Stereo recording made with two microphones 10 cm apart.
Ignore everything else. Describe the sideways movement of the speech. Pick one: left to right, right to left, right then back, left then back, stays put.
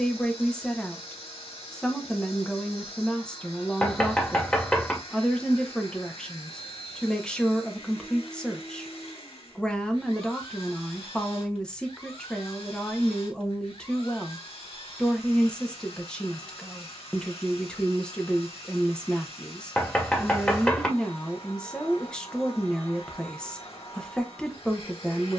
stays put.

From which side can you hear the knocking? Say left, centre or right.
centre.